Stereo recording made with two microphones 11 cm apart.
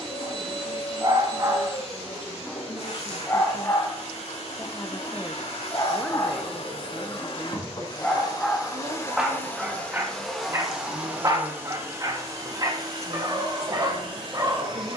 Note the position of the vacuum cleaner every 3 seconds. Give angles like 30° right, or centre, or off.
80° left, 70° left, 40° left, centre, 40° right.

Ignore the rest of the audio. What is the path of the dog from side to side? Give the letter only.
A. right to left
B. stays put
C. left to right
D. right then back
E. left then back
E.